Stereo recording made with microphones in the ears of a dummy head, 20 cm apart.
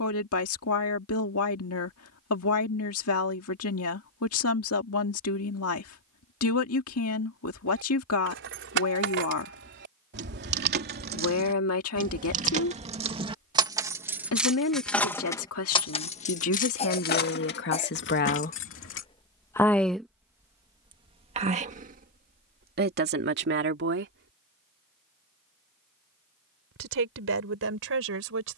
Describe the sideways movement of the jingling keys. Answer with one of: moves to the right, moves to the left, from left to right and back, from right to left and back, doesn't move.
moves to the left.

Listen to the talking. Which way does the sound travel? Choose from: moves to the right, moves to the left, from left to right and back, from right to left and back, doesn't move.
moves to the right.